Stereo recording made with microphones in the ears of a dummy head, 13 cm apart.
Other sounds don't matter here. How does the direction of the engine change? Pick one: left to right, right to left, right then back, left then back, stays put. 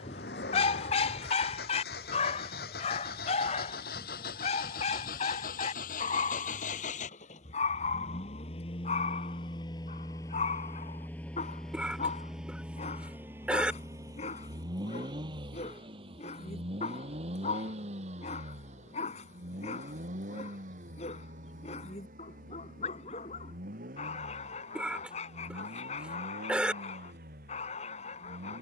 left to right.